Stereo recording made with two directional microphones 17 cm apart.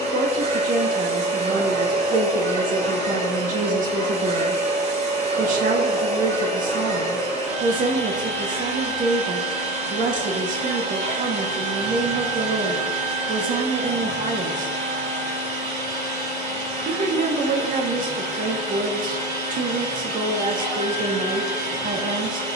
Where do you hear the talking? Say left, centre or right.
right.